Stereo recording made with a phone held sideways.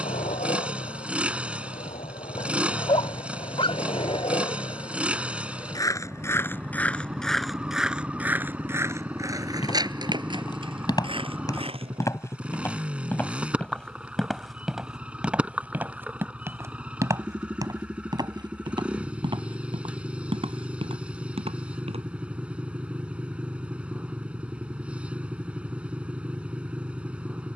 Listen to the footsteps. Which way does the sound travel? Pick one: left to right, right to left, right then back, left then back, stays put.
left to right.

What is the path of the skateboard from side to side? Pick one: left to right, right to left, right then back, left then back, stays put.
left to right.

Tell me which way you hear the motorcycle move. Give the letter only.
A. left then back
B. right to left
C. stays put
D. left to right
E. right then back
C.